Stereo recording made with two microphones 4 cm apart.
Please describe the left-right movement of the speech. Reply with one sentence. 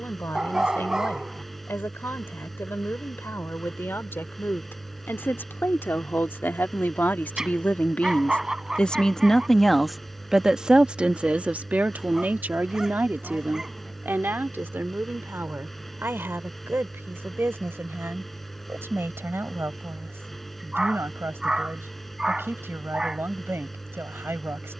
In this clip you hear the speech move to the right.